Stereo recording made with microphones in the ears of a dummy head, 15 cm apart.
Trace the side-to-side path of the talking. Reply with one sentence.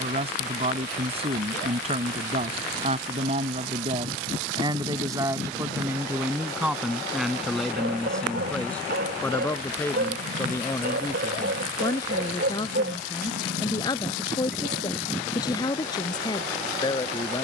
In this clip you hear the talking move from right to left.